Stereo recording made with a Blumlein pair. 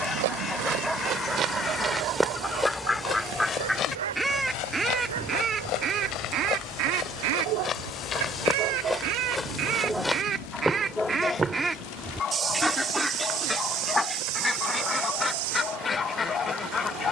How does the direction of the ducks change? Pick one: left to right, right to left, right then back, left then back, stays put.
right then back.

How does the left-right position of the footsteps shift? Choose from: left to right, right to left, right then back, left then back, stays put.
left then back.